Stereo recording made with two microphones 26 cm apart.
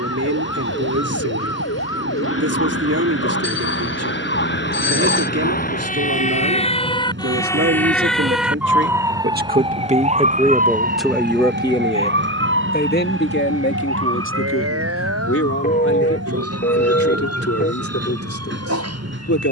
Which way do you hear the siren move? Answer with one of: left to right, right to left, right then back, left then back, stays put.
left to right.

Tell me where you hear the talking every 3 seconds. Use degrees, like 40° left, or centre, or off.
70° right, 70° right, 60° right, 10° right, 40° left, 60° left, 60° left.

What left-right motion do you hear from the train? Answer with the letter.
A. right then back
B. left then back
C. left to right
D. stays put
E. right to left
D.